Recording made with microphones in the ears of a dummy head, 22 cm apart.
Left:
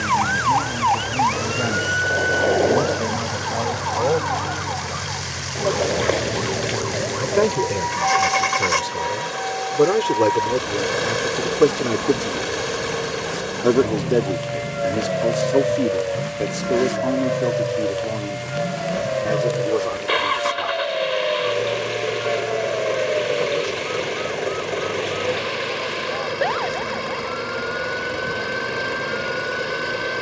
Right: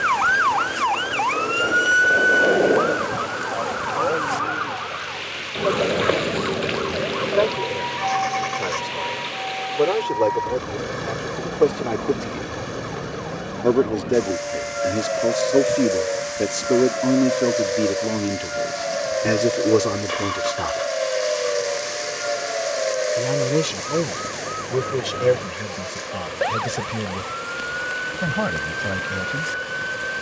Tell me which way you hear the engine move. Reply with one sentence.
You can hear the engine stay in one place.